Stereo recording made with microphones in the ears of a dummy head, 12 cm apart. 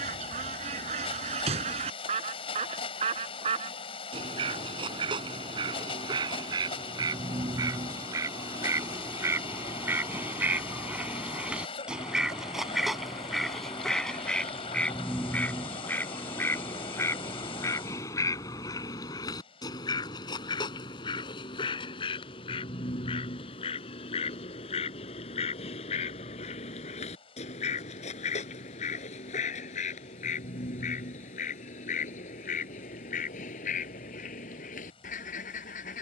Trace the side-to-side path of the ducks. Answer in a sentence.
You can hear the ducks go from the right side to the left.